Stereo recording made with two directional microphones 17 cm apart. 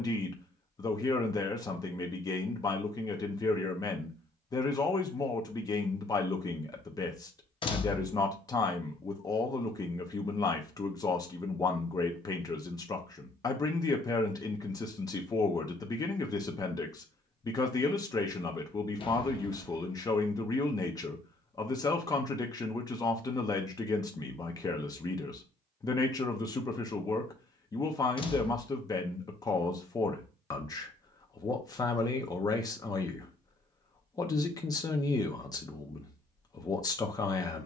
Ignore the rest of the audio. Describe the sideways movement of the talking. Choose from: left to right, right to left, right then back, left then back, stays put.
stays put.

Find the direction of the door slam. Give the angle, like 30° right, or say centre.
30° left.